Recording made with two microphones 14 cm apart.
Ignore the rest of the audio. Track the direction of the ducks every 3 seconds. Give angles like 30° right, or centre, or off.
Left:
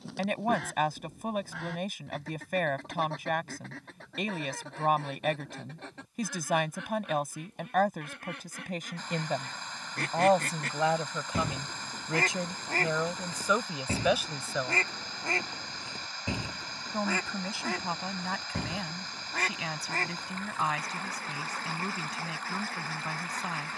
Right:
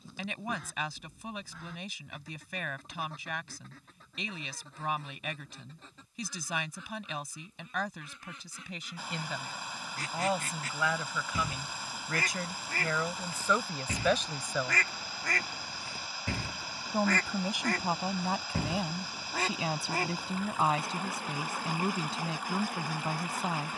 80° left, 80° left, 70° left, 60° left, 40° left, 10° left, 10° right, 10° right.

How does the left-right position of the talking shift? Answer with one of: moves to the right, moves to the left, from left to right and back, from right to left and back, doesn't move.
moves to the right.